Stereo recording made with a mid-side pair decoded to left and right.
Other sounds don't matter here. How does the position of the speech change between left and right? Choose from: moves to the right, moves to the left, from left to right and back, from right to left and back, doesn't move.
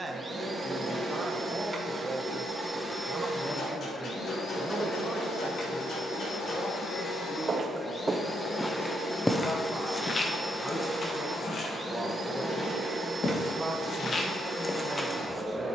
from right to left and back.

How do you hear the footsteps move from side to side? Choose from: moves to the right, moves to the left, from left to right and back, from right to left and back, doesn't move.
from right to left and back.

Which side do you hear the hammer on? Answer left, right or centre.
left.